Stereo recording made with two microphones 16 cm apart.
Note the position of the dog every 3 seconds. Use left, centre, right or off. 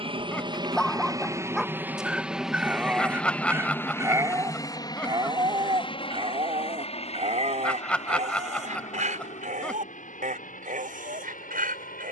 centre, right, right, right.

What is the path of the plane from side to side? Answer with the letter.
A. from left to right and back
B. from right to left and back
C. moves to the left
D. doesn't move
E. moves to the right
C.